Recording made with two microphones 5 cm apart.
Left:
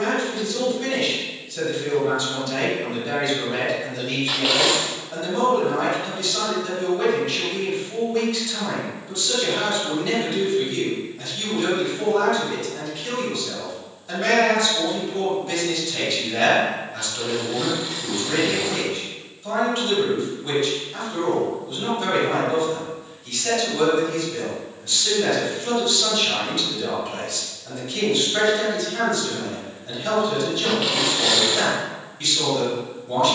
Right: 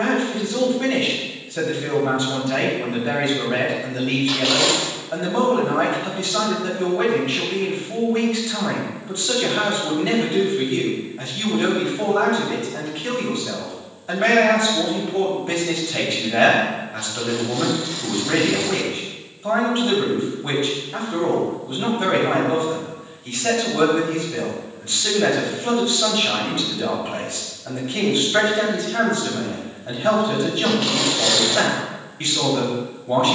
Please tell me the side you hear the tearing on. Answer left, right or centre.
centre.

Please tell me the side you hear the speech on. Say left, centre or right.
right.